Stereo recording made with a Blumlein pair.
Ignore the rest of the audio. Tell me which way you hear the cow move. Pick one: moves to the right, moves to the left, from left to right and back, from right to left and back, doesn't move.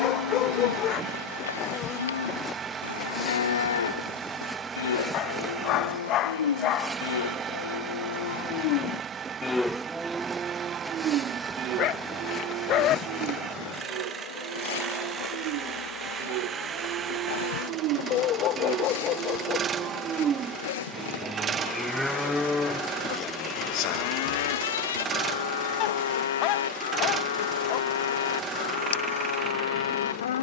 from left to right and back.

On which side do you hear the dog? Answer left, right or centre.
left.